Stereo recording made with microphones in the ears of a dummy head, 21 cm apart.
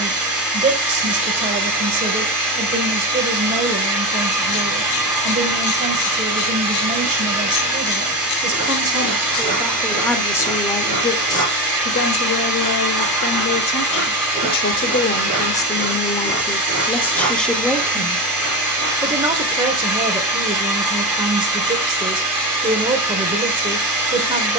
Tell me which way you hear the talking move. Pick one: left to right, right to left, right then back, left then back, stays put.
left then back.